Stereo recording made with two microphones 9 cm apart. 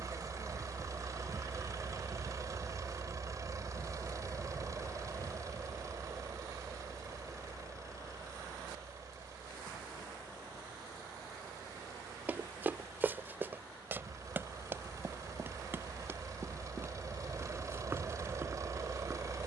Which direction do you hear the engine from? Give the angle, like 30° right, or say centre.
40° right.